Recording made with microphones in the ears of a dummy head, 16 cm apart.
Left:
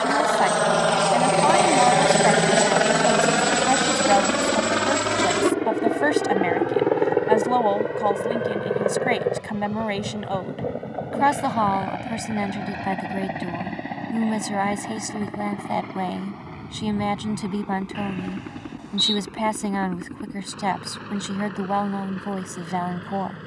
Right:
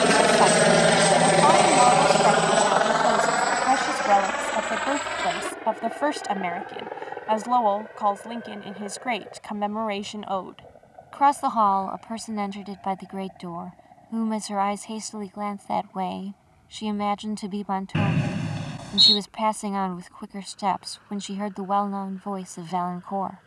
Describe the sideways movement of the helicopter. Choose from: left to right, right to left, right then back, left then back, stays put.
right to left.